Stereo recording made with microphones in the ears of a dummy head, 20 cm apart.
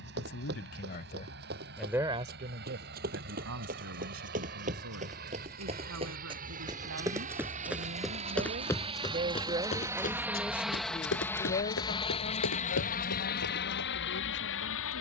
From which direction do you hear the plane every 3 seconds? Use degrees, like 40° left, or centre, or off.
60° right, 50° right, 40° right, centre, 40° left.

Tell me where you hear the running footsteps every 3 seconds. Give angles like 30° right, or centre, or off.
50° right, 40° right, 10° right, 40° left, 70° left.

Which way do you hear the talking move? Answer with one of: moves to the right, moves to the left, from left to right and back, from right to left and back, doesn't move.
from left to right and back.